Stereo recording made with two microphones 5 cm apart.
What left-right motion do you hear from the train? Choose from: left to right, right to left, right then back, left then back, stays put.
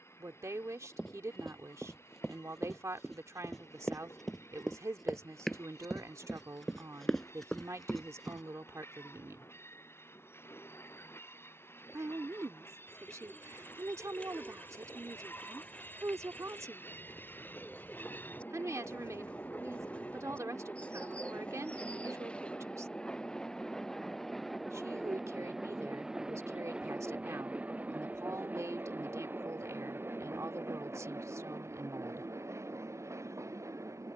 left to right.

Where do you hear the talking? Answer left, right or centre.
right.